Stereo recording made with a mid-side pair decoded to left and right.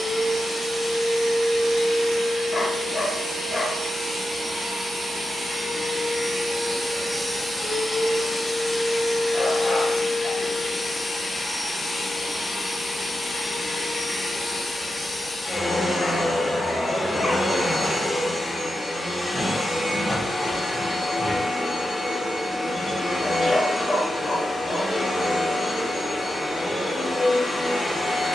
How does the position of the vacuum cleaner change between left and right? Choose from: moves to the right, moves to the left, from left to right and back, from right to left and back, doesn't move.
moves to the left.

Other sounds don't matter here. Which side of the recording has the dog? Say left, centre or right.
left.